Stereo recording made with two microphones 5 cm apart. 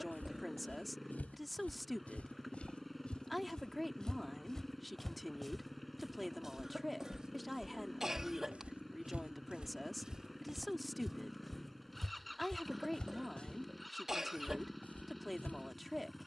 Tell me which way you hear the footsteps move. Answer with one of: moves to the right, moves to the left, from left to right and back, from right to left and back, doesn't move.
from left to right and back.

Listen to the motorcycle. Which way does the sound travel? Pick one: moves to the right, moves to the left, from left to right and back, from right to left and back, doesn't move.
doesn't move.